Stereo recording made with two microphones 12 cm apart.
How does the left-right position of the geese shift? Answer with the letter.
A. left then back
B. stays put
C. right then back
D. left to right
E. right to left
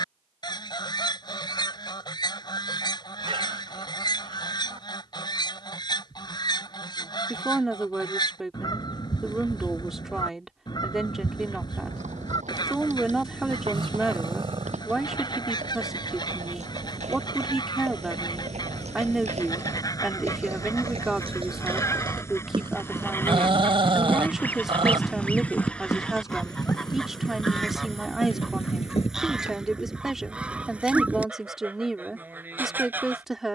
D.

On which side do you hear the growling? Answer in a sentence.
In this clip you hear the growling on the right.